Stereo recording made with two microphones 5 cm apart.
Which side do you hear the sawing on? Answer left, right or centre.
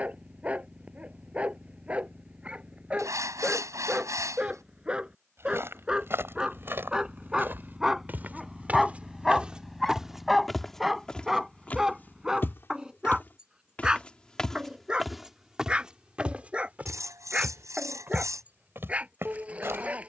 right.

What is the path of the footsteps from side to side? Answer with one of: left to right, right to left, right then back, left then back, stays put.
left then back.